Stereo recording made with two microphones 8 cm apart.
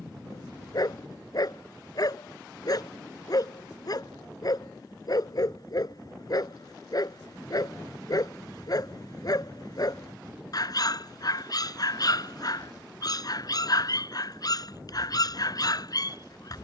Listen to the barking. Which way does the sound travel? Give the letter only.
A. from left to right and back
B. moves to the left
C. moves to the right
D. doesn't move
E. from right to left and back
D.